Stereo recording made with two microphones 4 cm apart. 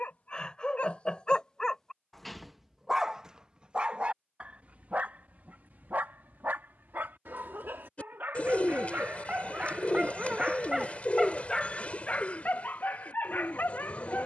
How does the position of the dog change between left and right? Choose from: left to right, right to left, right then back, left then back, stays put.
right then back.